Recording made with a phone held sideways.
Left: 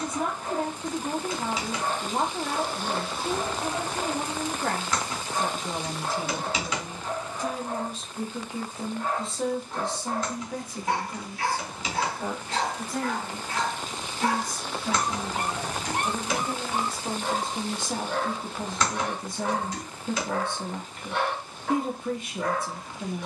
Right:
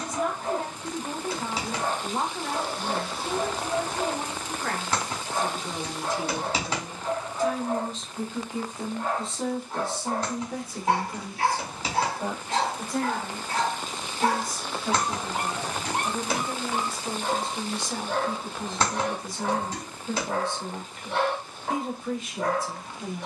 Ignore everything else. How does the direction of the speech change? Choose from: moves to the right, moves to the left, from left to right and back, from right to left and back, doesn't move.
from left to right and back.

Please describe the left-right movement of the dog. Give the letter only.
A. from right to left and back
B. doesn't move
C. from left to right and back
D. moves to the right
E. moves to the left
B.